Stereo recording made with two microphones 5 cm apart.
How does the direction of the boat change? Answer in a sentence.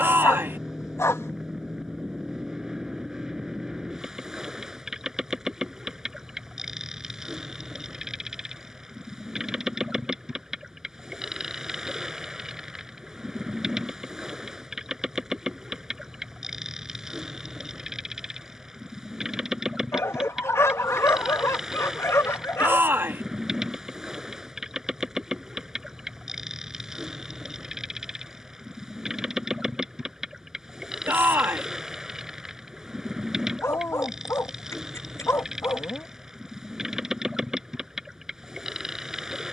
You can hear the boat stay put.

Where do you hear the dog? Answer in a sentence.
You can hear the dog on the left.